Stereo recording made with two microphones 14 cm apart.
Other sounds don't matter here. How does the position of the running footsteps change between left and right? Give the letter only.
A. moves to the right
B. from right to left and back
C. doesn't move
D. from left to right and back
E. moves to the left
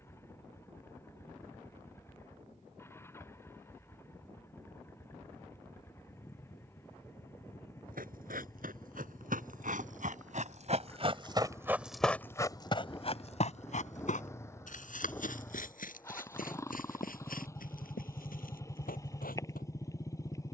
E.